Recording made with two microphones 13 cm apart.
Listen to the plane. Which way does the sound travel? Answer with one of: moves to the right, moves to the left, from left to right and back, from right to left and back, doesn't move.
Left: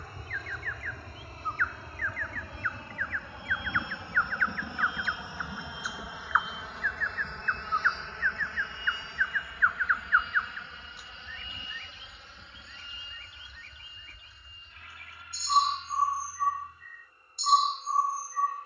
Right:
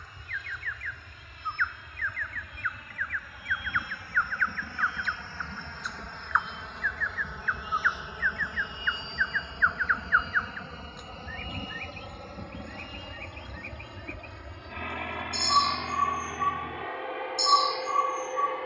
moves to the right.